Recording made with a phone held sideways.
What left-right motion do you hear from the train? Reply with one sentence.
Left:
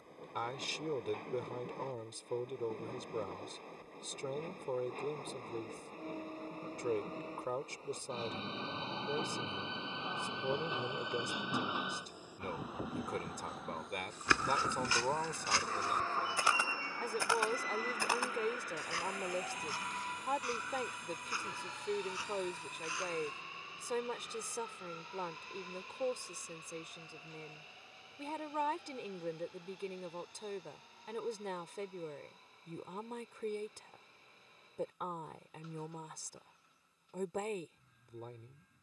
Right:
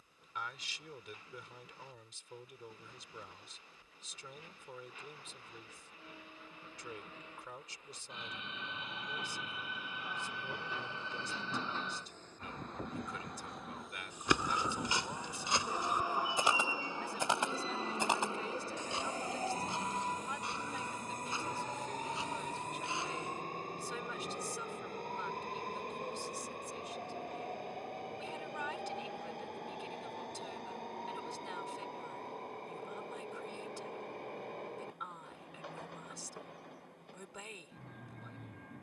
In this clip you hear the train move from left to right.